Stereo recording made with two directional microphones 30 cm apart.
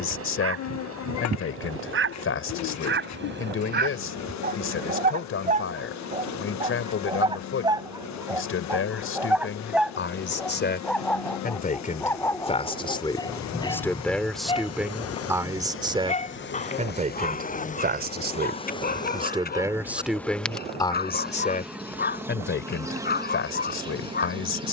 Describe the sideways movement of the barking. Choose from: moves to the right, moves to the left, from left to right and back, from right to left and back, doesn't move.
moves to the left.